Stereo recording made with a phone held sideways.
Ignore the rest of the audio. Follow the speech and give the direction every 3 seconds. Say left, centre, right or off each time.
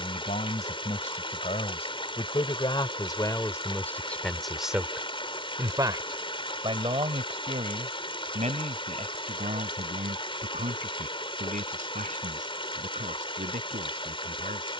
left, centre, right, right, right.